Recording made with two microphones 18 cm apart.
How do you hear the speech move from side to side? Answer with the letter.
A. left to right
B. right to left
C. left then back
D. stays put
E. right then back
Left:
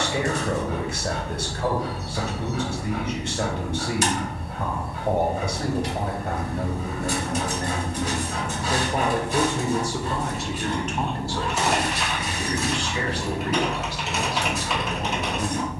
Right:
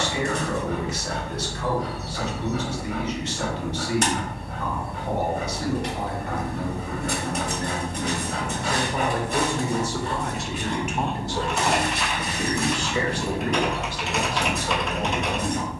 A.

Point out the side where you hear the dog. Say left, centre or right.
right.